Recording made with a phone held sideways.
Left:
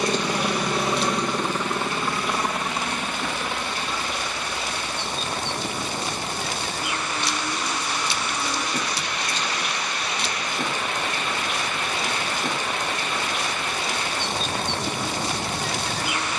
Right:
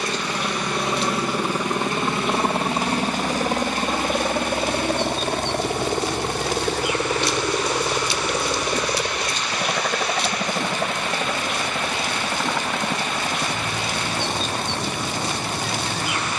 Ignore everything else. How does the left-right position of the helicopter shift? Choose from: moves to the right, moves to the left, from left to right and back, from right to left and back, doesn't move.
moves to the right.